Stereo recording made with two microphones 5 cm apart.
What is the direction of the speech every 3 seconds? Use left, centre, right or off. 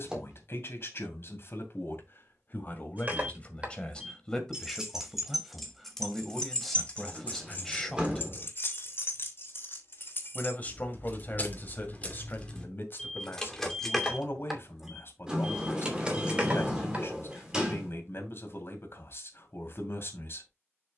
left, centre, centre, left, left, left, left.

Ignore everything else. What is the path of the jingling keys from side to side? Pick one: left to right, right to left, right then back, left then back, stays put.
left then back.